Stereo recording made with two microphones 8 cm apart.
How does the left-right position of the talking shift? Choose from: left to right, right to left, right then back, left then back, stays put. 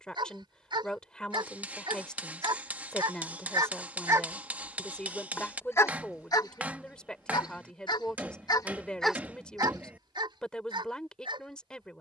stays put.